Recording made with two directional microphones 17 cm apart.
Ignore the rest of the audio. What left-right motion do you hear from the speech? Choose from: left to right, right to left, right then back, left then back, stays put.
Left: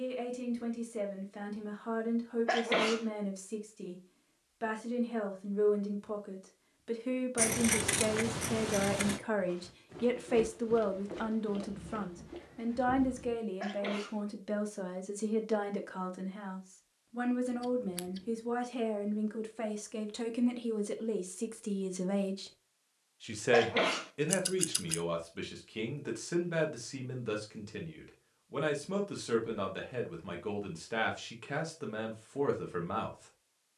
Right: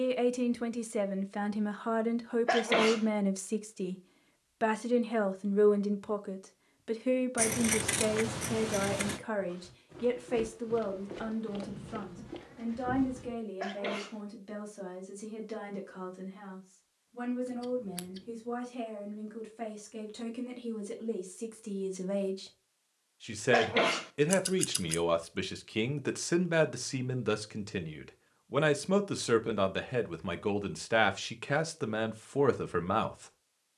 left then back.